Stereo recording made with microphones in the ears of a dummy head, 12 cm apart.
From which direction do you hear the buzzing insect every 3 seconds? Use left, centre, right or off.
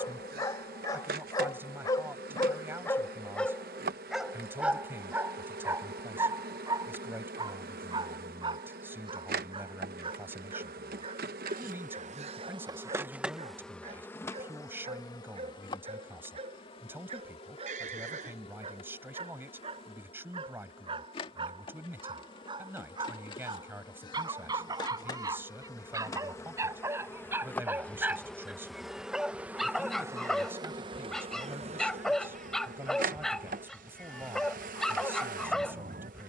right, right, right, right, centre, left, left, left, left, centre, right, right.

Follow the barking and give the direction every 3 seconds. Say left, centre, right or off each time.
left, centre, right, right, right, right, right, right, right, centre, centre, centre.